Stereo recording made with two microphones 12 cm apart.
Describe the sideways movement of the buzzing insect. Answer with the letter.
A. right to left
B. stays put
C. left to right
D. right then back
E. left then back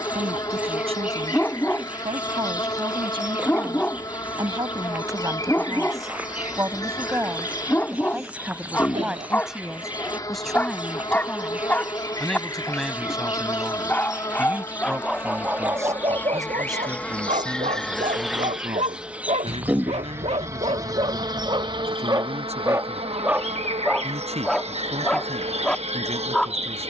C.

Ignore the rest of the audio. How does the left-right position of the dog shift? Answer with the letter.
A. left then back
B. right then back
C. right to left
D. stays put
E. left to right
B.